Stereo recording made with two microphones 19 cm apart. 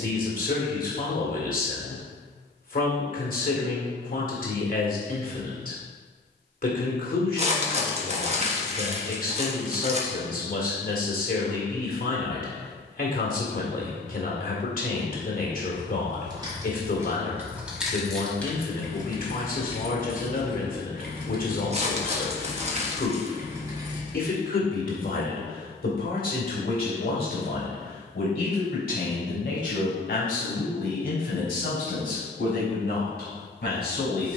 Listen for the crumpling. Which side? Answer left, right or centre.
right.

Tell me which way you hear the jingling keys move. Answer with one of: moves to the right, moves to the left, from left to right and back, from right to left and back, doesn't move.
from right to left and back.